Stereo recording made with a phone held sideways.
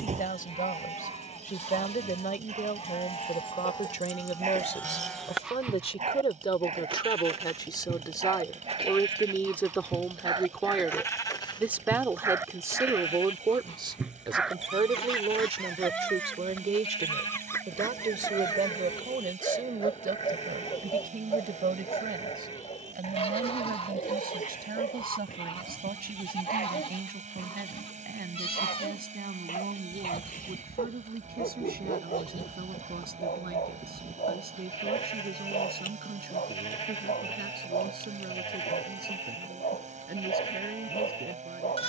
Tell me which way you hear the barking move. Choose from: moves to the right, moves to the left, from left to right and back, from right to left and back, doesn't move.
moves to the left.